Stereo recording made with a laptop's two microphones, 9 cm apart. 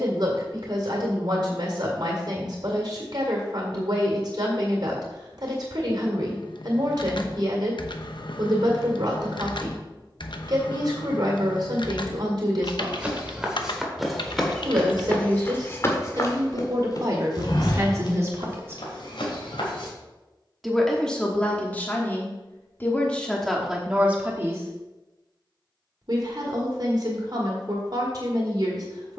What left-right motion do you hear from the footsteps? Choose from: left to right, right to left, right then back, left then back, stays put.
right to left.